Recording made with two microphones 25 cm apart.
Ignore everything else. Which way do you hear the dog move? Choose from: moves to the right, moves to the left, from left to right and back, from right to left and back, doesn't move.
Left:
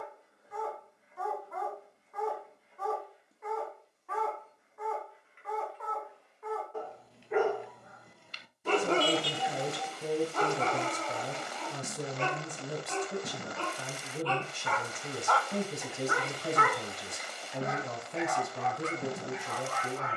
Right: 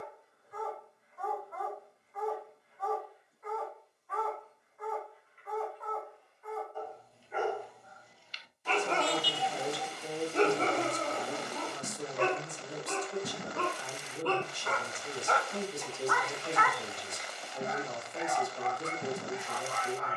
from left to right and back.